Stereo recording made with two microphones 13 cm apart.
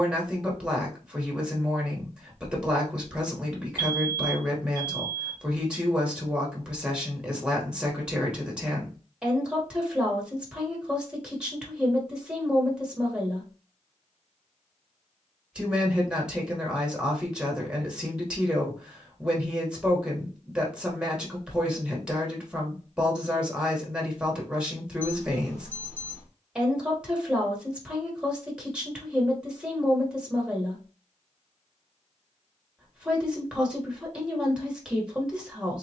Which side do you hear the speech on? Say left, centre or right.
centre.